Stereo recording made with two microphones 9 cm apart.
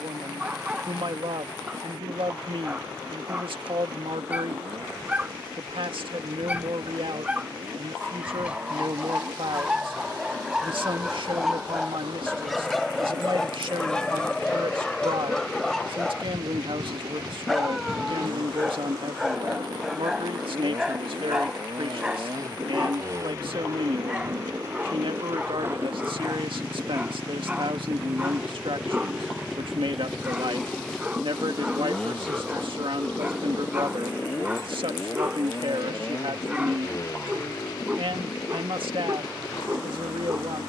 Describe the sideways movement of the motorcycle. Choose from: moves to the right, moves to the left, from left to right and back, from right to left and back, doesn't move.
moves to the left.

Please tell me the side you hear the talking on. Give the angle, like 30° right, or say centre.
70° right.